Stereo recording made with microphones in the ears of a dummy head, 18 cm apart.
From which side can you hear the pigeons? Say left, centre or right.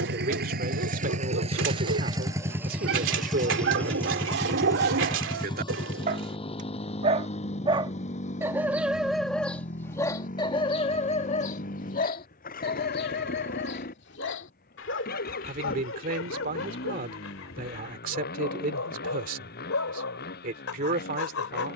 right.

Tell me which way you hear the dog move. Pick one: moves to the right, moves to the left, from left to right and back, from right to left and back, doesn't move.
moves to the left.